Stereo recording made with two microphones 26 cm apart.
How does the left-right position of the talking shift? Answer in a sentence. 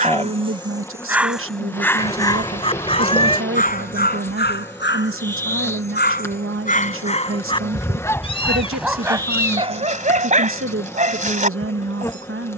In this clip you hear the talking stay in one place.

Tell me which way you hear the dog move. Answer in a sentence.
In this clip you hear the dog go left and come back.